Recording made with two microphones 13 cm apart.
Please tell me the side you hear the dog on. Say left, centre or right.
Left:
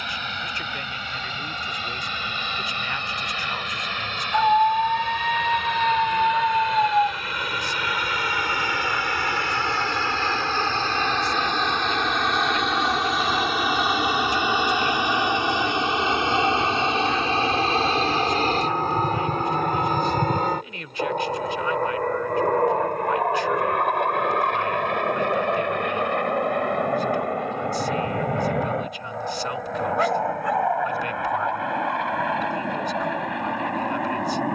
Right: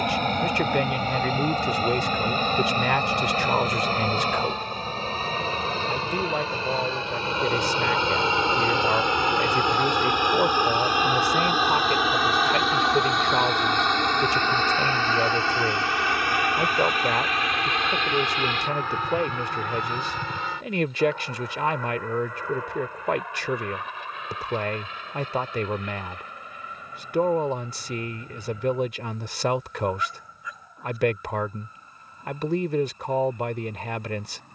left.